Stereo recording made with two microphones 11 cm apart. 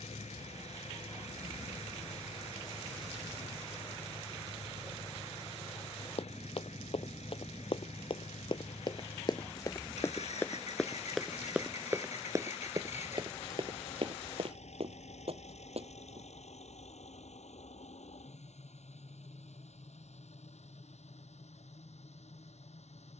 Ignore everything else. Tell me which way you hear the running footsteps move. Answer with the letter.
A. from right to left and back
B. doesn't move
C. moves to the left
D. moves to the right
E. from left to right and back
D.